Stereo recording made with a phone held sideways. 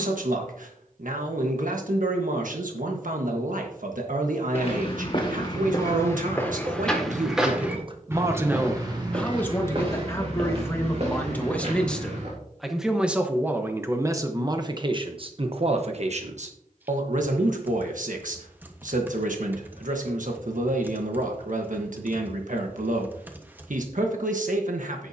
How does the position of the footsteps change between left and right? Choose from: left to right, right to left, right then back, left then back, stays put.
left to right.